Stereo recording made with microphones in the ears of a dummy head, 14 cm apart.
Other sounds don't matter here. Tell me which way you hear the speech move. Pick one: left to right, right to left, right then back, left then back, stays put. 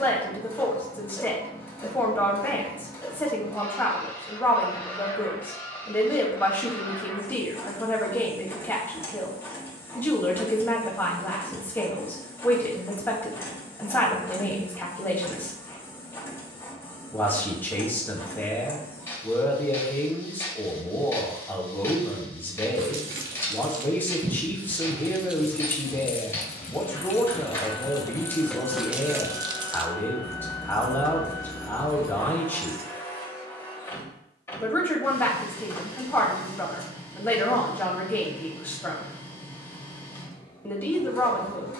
stays put.